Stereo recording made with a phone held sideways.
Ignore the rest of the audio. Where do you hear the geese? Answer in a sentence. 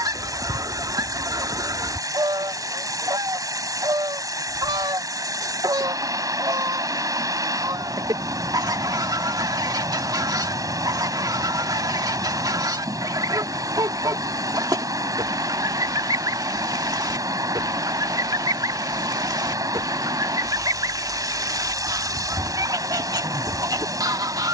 You can hear the geese on the right.